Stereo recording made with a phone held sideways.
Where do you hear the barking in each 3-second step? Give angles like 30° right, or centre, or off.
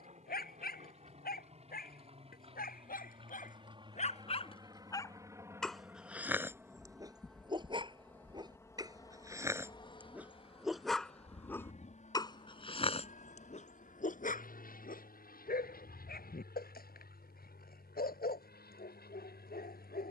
80° left, 40° left, 20° right, centre, 50° left, 80° left, 80° left.